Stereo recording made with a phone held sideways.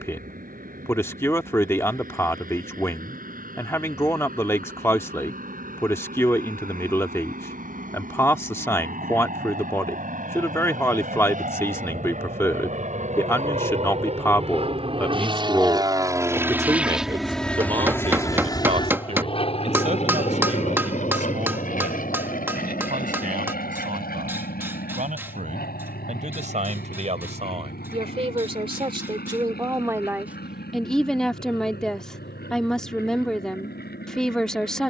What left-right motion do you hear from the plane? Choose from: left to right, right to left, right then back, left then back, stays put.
right to left.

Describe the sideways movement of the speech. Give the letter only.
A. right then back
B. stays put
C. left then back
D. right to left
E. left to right
A.